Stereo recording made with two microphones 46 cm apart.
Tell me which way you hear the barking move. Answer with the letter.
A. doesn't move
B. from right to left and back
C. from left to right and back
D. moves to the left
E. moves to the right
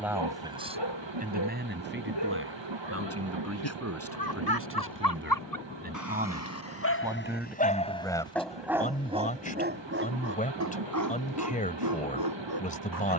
E.